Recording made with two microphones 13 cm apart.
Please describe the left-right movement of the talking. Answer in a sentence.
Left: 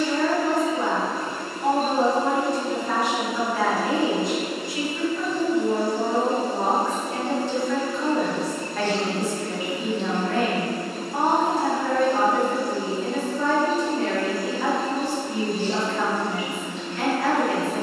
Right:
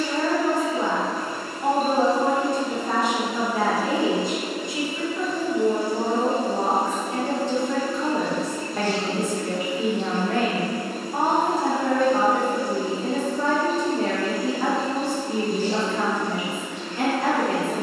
You can hear the talking stay put.